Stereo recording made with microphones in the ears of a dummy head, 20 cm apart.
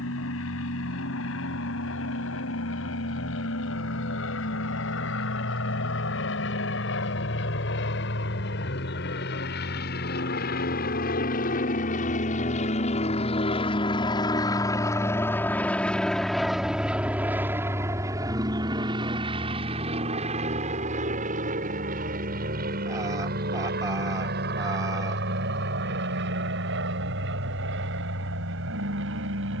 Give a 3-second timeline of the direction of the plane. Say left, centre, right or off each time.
left, left, left, left, left, centre, right, right, right, right.